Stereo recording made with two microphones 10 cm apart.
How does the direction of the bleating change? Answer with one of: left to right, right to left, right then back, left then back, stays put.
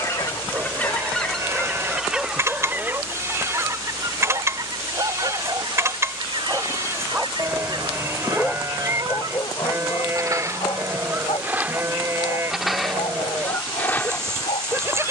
stays put.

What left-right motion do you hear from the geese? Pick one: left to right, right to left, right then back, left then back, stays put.
right then back.